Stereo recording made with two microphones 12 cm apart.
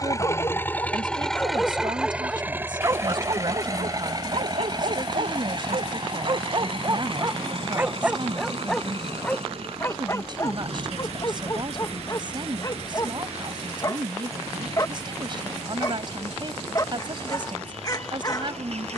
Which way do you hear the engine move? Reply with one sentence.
You can hear the engine move from left to right.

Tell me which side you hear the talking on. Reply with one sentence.
In this clip you hear the talking on the right.